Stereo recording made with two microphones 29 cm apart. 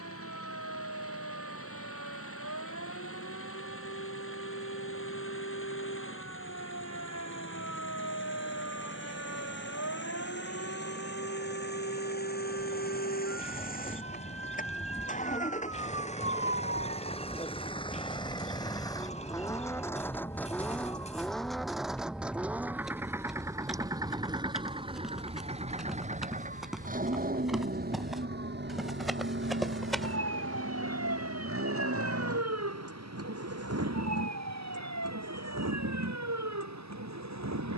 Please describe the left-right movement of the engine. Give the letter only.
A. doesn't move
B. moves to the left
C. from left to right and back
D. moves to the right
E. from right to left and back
D.